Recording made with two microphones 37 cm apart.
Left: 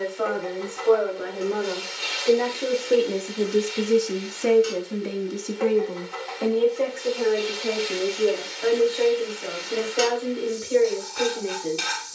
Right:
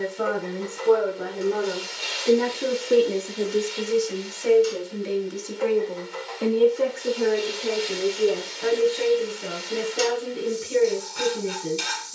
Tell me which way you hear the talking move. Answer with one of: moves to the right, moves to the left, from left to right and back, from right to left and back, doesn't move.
from right to left and back.